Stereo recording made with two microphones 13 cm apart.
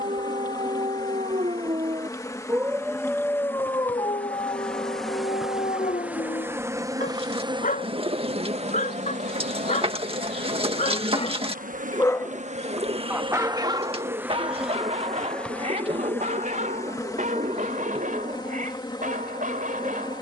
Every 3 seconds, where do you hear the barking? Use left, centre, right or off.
right, left, left, left, right, right, right.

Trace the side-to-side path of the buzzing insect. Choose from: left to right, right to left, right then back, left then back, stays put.
right then back.